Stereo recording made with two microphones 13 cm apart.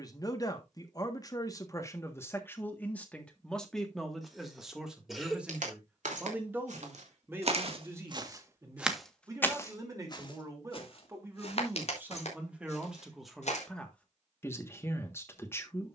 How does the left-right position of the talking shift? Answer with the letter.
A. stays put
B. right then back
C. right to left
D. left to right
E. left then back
B.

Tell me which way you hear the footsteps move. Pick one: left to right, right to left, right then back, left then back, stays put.
right to left.